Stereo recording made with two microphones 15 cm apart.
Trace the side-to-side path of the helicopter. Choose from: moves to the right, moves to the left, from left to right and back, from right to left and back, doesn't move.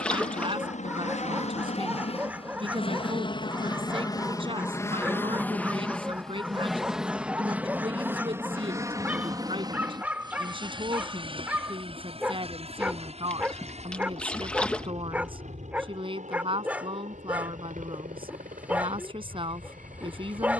moves to the right.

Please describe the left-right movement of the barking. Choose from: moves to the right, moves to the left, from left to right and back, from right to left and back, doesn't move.
doesn't move.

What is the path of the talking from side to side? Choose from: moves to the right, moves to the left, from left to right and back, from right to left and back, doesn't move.
doesn't move.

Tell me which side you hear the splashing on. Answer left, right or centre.
centre.